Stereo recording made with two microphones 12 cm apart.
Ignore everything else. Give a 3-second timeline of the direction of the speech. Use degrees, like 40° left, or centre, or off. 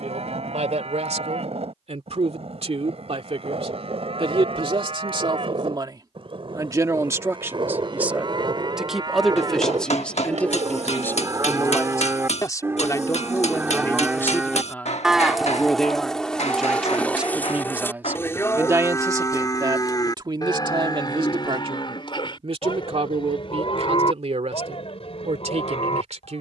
60° right, 50° right, 20° right, 10° left, 20° left, centre, 30° right, 50° right, 60° right.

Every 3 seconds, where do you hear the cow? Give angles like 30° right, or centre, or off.
60° right, 60° right, 50° right, 30° right, 20° right, 10° left, 30° left, 40° left, 50° left.